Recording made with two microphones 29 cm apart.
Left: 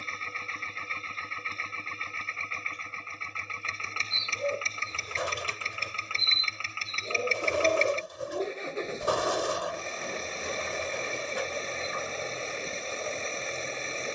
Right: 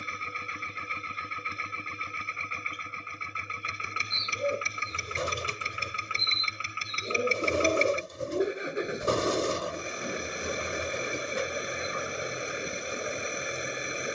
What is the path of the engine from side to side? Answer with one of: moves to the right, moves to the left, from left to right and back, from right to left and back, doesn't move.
doesn't move.